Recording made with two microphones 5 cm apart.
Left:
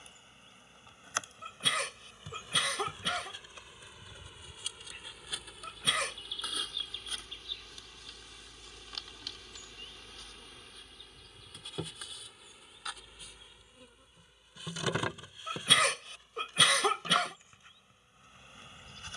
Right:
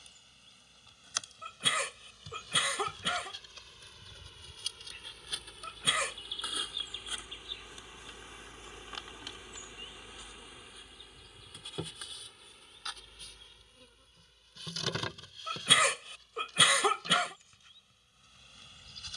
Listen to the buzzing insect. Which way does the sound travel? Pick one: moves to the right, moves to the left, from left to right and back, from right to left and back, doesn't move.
from left to right and back.